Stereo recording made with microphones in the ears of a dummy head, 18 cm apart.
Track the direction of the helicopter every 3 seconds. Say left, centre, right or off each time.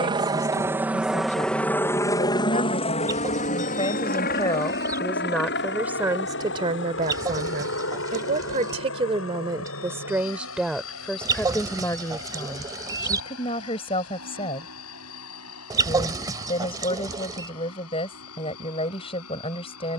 centre, left, left, left, left, left, left.